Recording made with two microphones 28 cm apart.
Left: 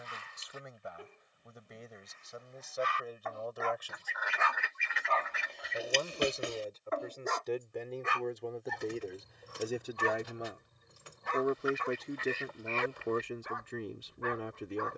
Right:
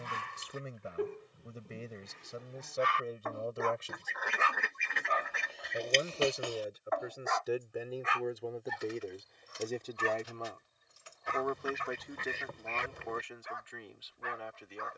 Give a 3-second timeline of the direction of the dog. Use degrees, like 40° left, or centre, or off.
70° right, 20° right, 30° left, 60° left, 60° left.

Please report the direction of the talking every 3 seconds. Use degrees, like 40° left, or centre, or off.
30° right, 20° right, 10° right, 20° left, 40° left.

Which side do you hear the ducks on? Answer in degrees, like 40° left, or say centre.
50° right.